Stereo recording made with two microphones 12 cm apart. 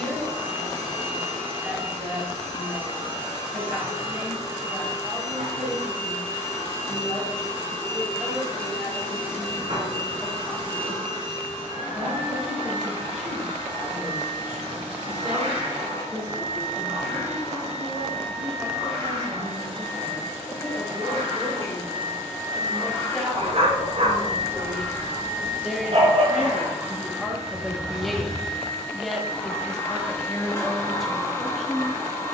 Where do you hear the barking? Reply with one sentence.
In this clip you hear the barking on the right.